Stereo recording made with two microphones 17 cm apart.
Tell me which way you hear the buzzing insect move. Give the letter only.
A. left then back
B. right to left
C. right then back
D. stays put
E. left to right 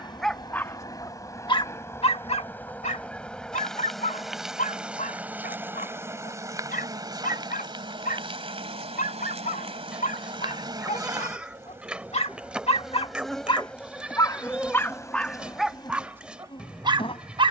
C.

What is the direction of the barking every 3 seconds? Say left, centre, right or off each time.
left, left, left, left, left, centre.